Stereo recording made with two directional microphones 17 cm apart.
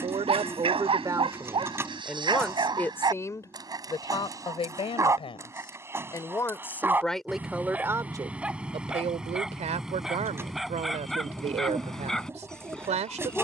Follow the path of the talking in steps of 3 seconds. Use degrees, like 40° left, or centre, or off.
10° right, 30° left, centre, 40° right, 40° right.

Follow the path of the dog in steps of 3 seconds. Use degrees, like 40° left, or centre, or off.
30° right, 20° right, 10° right, centre, centre.